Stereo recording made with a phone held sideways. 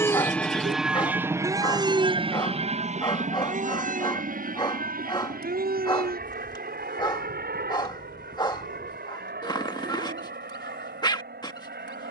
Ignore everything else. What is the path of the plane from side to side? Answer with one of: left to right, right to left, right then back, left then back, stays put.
left to right.